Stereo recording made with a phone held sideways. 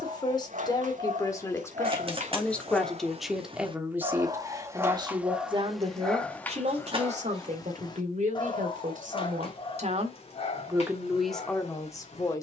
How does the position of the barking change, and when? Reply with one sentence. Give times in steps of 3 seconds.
In this clip you hear the barking on the right from 0 s and on the left from 6 s.